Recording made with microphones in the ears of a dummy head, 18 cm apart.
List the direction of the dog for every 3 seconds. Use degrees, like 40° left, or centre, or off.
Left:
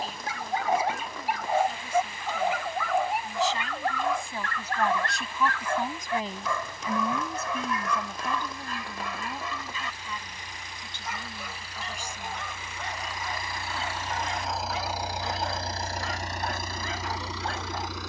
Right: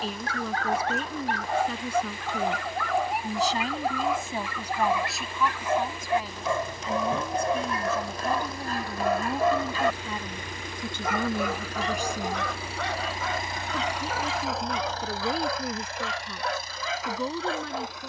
10° left, 10° right, 30° right, 50° right, 70° right, 70° right.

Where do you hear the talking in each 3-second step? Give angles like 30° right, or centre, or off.
60° right, 10° right, centre, 40° right, 60° right, 60° right.